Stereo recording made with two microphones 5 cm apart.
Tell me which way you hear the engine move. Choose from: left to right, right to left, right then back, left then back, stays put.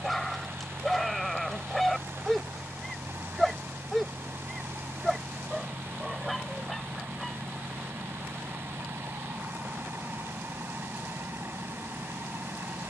stays put.